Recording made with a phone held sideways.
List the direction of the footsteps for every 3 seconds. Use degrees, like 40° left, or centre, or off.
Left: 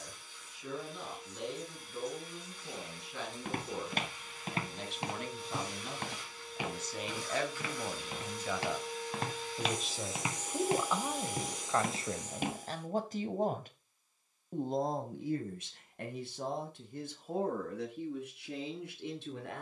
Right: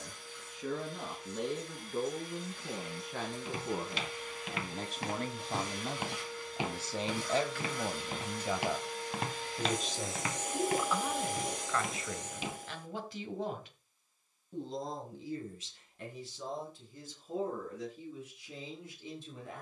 off, 40° left, 20° right, 20° left, 50° left, off, off.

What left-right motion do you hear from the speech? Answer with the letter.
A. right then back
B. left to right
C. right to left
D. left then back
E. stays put
C.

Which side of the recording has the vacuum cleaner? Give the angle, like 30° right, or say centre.
70° right.